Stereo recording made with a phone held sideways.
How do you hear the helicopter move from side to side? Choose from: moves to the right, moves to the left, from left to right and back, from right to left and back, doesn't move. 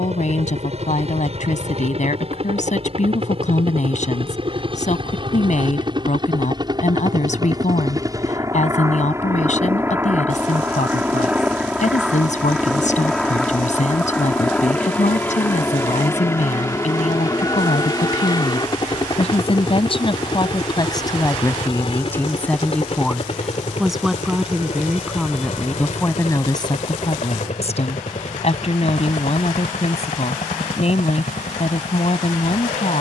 moves to the left.